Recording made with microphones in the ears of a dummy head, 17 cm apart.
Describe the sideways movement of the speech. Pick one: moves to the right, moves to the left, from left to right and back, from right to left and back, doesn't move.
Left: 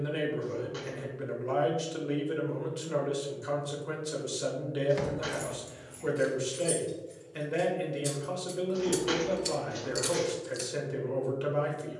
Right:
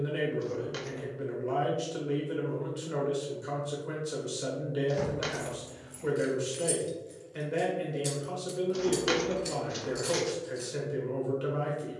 doesn't move.